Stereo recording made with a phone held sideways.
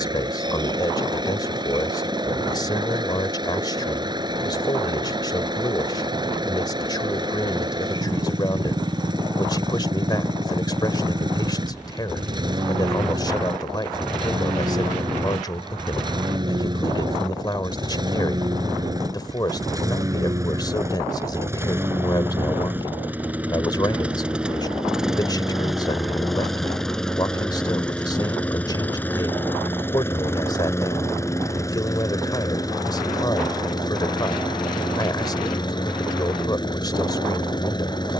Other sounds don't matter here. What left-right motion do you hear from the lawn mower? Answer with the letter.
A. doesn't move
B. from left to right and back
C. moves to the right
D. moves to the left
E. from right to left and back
D.